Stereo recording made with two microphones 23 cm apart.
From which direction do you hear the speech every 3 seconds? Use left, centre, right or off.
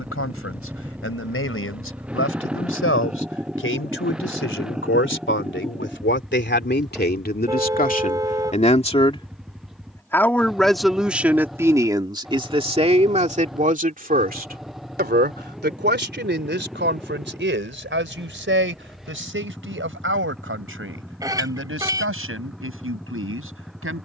left, left, left, centre, right, right, right, right.